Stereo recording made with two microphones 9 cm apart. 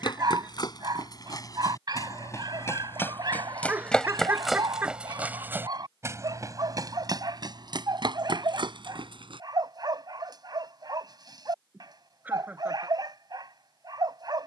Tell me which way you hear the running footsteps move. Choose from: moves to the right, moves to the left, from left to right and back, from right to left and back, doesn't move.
moves to the right.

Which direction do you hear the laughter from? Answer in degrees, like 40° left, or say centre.
20° right.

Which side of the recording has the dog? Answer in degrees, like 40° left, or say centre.
50° right.